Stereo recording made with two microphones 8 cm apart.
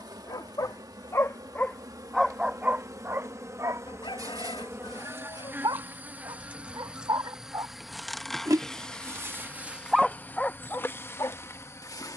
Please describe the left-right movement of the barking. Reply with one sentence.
You can hear the barking go right and come back.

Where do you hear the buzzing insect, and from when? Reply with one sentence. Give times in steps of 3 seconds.
In this clip you hear the buzzing insect on the right from 0 s, in the centre from 6 s and on the left from 9 s.